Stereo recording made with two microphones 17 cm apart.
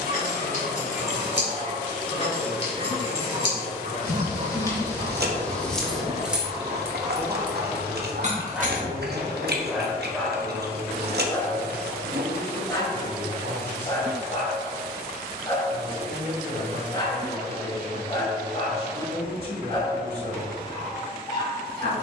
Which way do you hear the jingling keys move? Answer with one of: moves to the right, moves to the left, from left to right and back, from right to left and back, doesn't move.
moves to the right.